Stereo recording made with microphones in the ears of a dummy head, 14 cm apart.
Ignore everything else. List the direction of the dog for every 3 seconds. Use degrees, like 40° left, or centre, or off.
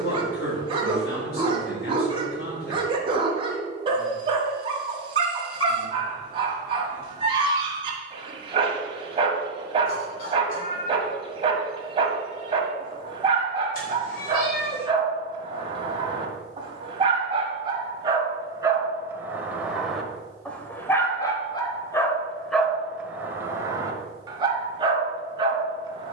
30° right, 30° right, 30° right, 30° right, 30° right, 30° right, 10° right, centre, 30° right.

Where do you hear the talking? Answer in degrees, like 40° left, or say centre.
60° left.